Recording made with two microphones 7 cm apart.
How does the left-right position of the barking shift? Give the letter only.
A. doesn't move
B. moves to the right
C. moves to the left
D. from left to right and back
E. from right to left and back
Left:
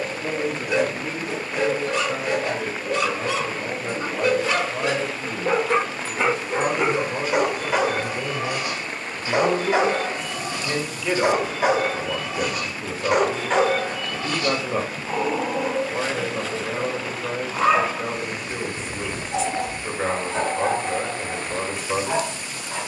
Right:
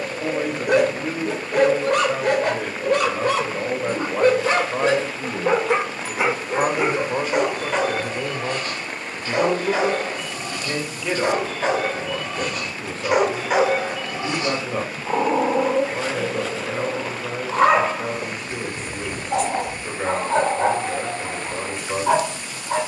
E.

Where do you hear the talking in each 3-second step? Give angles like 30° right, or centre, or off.
70° right, 60° right, 30° right, 10° right, 10° left, 10° left, 10° left, 10° left.